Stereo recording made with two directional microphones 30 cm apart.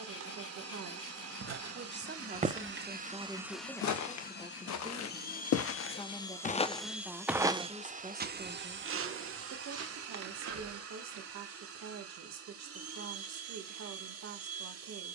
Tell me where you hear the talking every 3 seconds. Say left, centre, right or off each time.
right, centre, centre, right, right.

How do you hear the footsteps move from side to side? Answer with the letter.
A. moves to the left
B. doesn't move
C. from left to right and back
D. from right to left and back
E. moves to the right
D.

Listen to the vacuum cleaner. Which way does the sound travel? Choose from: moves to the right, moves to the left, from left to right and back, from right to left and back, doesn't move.
from right to left and back.